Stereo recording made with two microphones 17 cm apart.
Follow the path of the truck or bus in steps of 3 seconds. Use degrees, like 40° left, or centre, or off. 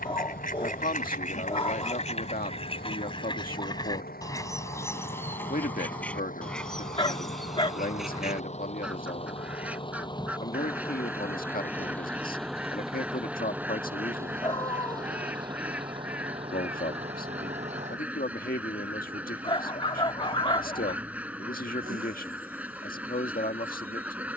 70° left, 60° left, 50° left, 20° left, 10° right, 30° right, 50° right, 60° right.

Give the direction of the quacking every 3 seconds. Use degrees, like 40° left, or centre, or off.
50° left, 20° left, centre, 10° right, 10° right, 10° right, 10° right, 10° right.